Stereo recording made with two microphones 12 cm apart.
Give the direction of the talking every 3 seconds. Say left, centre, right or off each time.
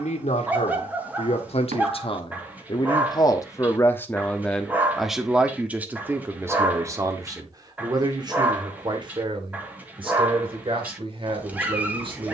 left, centre, right, right.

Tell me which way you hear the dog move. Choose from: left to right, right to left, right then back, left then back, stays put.
stays put.